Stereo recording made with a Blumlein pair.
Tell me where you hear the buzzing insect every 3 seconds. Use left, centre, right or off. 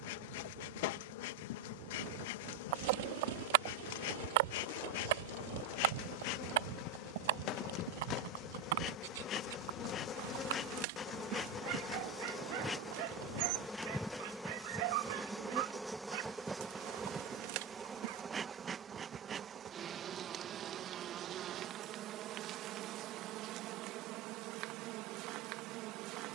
left, left, left, left, centre, centre, right, right, right.